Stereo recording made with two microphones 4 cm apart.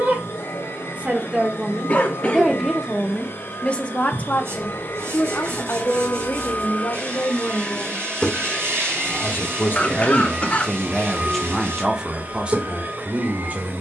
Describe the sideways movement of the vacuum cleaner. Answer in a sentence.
You can hear the vacuum cleaner go from the left side to the right.